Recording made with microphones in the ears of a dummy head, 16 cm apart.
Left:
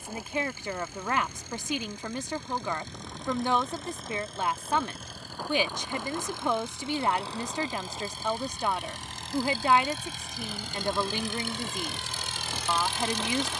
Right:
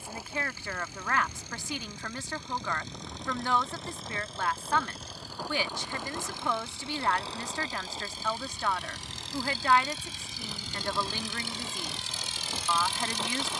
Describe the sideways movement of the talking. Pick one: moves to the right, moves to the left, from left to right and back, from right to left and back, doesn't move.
doesn't move.